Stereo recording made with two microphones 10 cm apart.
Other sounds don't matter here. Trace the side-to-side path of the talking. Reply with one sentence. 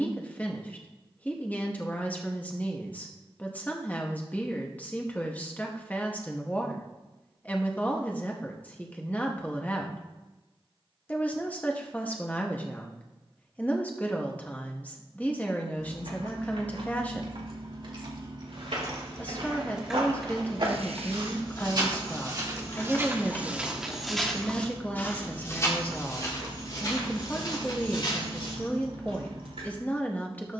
You can hear the talking stay in one place.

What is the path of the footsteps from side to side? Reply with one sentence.
In this clip you hear the footsteps go from the right side to the left.